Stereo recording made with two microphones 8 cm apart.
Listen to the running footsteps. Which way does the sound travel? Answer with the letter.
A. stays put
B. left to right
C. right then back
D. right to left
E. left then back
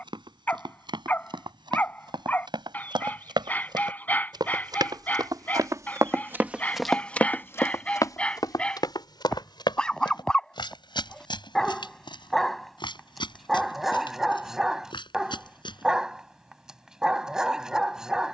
D.